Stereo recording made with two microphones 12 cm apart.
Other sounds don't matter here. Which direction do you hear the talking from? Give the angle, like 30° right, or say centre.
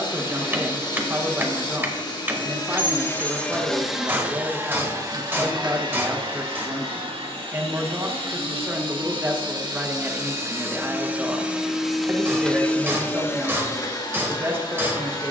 20° right.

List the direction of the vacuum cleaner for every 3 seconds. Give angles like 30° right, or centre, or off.
40° left, 20° right, 50° right, 20° right, 20° left.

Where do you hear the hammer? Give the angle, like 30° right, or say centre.
20° right.